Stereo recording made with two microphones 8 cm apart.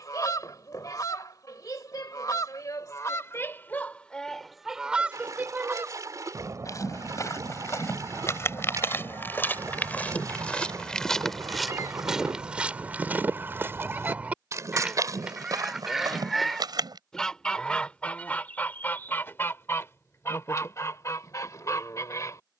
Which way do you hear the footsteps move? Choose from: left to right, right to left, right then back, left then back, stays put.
left to right.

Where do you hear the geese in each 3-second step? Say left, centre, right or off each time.
left, centre, right, right, right, centre, left, left.